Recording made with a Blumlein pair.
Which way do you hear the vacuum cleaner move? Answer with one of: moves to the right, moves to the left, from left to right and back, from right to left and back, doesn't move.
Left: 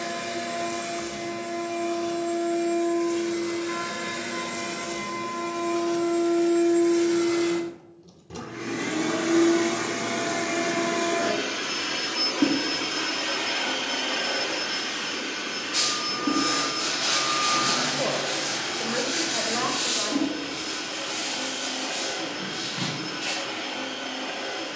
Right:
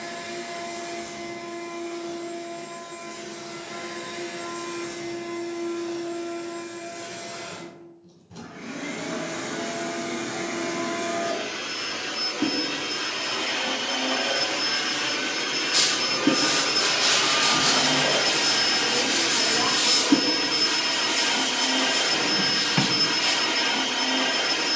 moves to the right.